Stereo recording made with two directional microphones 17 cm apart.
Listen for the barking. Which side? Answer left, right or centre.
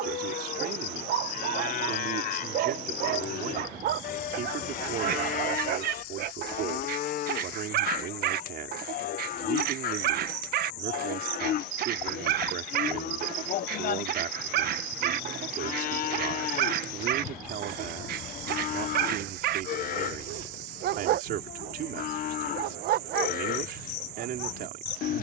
right.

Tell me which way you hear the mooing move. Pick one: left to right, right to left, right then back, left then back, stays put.
stays put.